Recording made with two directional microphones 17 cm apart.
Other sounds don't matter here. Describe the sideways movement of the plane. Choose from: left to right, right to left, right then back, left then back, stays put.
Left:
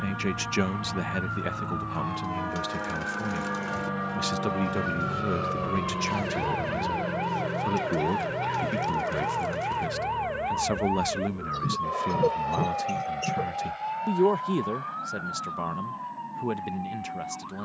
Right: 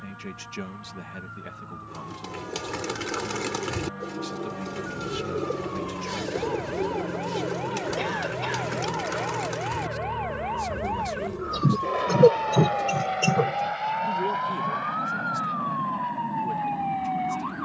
left to right.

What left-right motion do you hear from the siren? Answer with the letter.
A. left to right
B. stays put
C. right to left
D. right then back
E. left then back
A.